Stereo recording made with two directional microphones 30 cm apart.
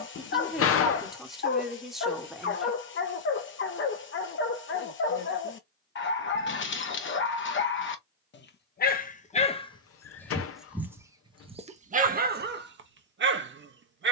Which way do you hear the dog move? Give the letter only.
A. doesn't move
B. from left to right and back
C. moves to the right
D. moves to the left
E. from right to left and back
C.